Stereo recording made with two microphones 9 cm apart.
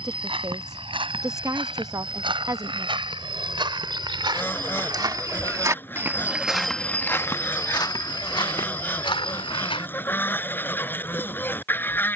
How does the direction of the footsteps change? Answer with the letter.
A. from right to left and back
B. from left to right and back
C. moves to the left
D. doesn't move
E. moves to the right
C.